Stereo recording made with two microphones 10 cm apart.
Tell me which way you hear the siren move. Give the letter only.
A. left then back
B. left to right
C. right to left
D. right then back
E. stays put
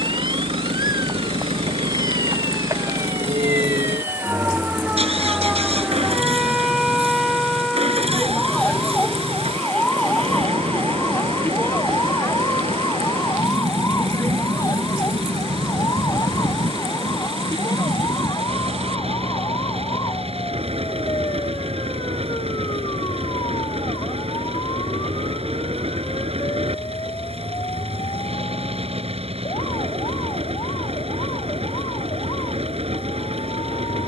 C.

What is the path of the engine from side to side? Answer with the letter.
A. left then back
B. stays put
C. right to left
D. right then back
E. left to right
B.